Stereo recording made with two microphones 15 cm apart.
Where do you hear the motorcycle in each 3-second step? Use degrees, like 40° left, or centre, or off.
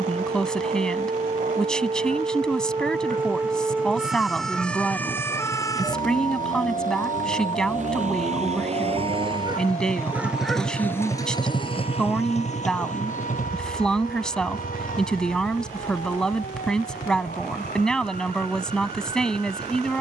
80° right, 70° right, 60° right, centre, 60° left, 70° left, 80° left.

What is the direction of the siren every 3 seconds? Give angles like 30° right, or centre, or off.
40° right, centre, 40° left, 60° left, 70° left, 70° left, 70° left.